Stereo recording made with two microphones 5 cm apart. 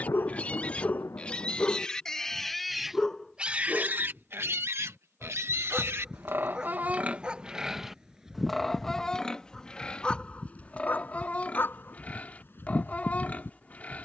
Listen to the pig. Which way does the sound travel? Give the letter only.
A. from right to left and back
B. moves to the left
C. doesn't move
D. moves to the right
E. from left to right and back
E.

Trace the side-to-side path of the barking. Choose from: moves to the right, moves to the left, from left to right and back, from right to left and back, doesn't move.
from left to right and back.